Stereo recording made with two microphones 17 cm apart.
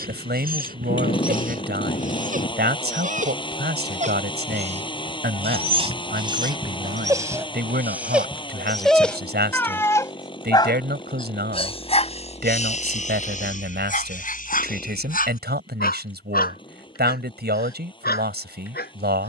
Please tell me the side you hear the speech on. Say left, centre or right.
right.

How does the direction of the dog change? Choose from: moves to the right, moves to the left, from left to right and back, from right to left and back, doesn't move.
moves to the left.